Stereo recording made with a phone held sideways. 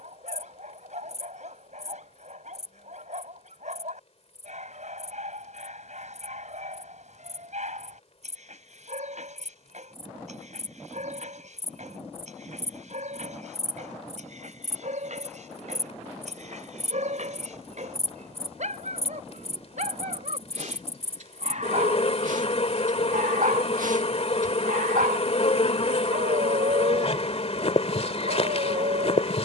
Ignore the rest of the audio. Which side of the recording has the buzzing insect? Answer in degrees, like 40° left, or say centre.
50° left.